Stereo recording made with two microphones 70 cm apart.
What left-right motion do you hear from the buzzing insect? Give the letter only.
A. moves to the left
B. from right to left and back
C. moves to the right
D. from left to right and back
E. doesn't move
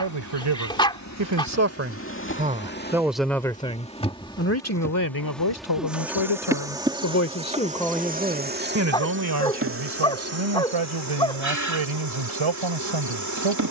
C.